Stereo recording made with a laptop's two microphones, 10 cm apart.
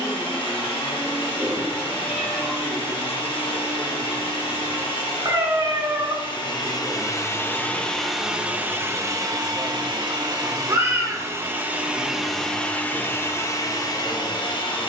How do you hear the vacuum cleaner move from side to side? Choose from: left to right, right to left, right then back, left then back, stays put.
right then back.